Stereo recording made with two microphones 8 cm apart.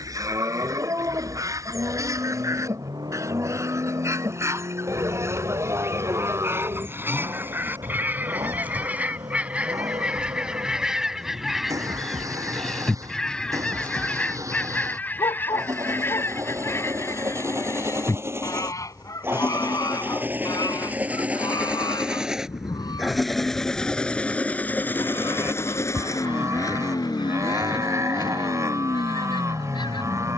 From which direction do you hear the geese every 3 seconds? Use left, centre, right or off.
right, right, right, centre, centre, left, left, left, left, left.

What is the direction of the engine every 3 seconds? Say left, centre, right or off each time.
right, right, right, right, right, right, right, centre, left, left.